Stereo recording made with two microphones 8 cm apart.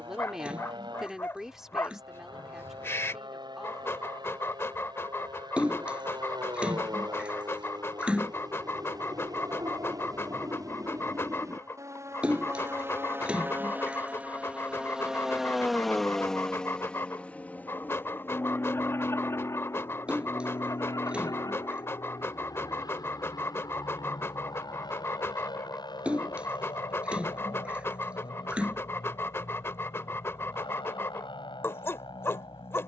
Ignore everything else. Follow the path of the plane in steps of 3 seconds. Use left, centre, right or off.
right, right, right, right, right, centre, left, left, left, left, left.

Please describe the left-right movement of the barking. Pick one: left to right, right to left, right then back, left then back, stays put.
stays put.